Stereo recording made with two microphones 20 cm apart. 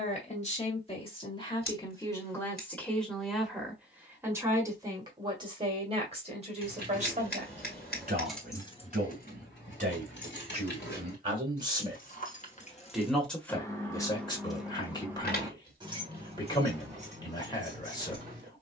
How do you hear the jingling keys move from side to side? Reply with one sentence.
You can hear the jingling keys go left and come back.